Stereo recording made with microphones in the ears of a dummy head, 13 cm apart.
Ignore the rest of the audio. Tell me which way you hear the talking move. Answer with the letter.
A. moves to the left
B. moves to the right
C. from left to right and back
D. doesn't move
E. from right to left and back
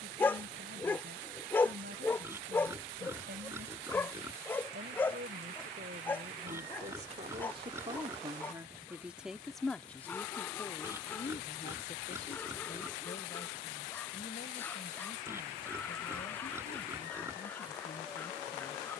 A.